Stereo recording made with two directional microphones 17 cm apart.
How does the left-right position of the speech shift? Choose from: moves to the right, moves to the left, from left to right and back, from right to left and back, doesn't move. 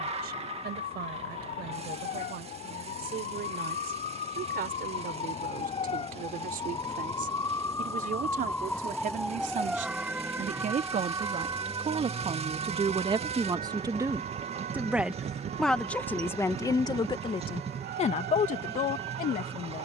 moves to the left.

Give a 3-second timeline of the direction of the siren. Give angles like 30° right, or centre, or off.
60° left, 40° left, 20° left, 10° right, 40° right, 60° right, 70° right.